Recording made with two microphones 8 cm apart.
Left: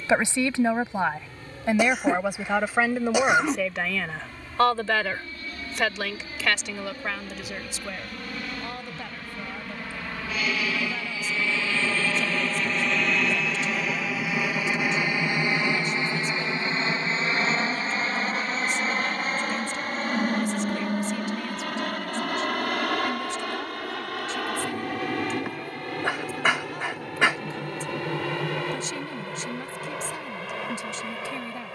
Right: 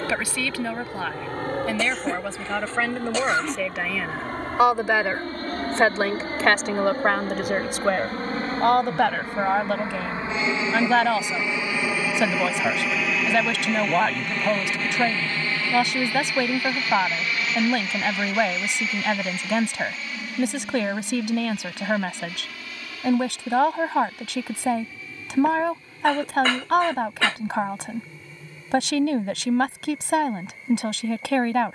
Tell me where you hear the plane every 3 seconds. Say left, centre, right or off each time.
right, right, right, right, centre, left, left, left, left, left, left.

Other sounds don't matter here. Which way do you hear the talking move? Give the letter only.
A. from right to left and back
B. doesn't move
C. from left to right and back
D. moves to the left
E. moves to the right
E.